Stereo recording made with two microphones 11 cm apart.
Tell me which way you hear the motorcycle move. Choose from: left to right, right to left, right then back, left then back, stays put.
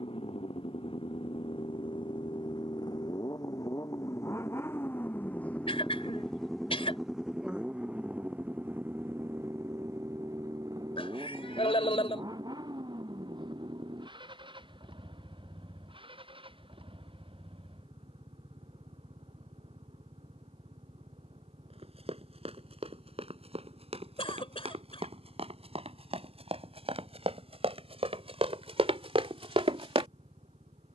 left to right.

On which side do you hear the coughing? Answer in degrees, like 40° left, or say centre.
60° left.